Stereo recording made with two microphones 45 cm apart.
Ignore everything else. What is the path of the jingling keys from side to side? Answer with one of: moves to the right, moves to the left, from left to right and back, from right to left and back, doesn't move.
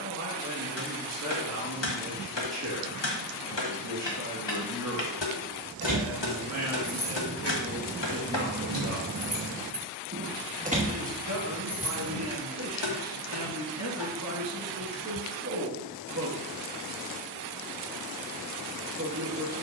moves to the left.